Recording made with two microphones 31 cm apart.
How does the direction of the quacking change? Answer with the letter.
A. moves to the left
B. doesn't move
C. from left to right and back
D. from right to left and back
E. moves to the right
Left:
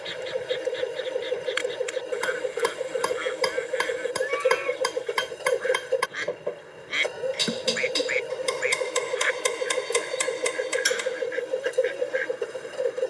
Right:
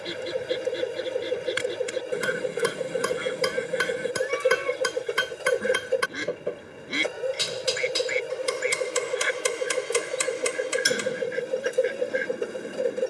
B.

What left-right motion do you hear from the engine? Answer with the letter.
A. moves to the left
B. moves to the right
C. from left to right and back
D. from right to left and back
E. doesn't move
E.